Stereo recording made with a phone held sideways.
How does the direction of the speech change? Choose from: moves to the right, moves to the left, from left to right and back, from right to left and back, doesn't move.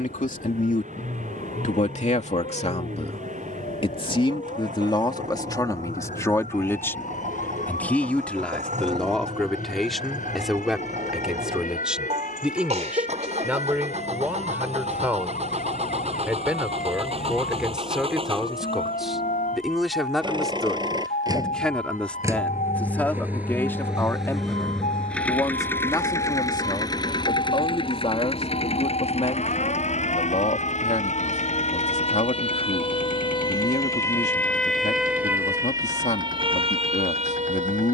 from left to right and back.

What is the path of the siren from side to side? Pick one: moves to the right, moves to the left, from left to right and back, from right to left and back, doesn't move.
moves to the right.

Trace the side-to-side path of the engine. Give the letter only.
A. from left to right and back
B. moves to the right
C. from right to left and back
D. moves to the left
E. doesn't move
D.